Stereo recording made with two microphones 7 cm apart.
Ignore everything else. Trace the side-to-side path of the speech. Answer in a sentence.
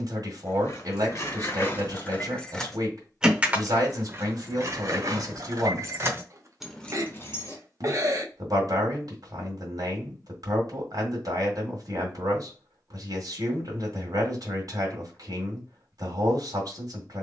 In this clip you hear the speech stay put.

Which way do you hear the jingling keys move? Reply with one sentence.
In this clip you hear the jingling keys move from left to right and back again.